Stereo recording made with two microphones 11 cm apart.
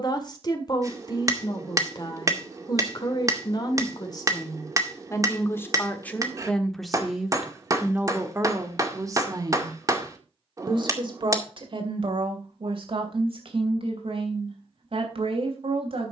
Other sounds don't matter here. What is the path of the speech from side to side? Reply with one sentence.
You can hear the speech go from the left side to the right.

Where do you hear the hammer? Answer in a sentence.
In this clip you hear the hammer on the right.